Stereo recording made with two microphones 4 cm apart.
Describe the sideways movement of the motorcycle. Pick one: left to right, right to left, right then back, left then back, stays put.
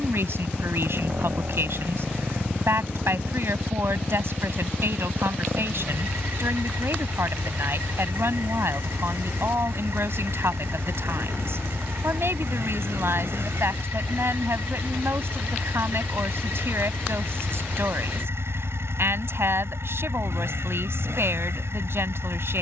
stays put.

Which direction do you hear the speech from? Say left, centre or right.
right.